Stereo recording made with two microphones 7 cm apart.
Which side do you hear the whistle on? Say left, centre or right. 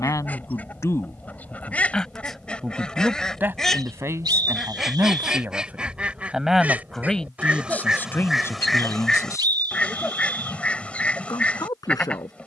right.